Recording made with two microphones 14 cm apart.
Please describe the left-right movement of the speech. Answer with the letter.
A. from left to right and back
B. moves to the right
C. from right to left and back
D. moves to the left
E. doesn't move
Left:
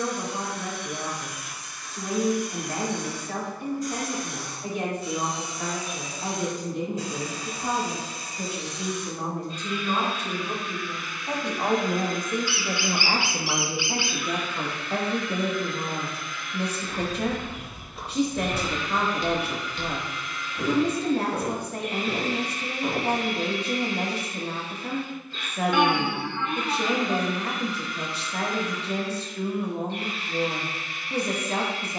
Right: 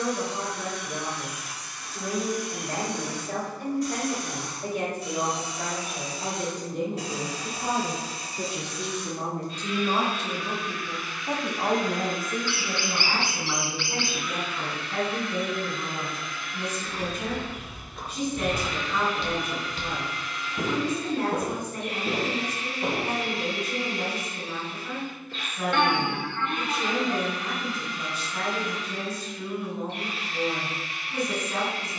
D.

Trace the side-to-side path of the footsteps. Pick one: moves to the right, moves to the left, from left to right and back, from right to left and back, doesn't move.
moves to the right.